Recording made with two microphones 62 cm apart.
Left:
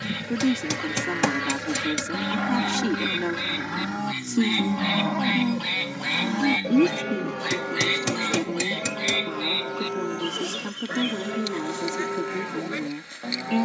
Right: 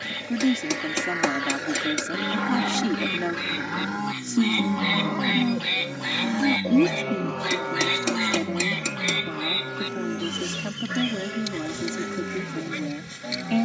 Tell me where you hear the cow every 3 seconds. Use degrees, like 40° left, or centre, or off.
40° left, 10° left, 50° left, 70° left, 70° left.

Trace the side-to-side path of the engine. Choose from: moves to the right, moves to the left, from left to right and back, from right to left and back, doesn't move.
moves to the right.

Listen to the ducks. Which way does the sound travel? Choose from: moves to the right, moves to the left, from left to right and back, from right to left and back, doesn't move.
moves to the right.